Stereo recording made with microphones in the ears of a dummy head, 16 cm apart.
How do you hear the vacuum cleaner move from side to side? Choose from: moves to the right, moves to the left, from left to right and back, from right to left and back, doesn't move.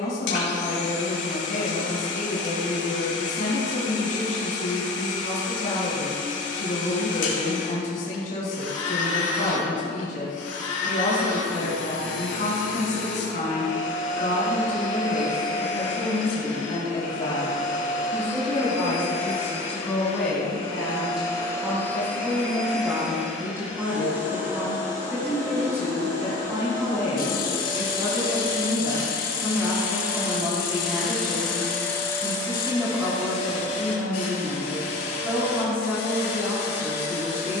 from left to right and back.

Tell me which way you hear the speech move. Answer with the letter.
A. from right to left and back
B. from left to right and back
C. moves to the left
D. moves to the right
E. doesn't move
D.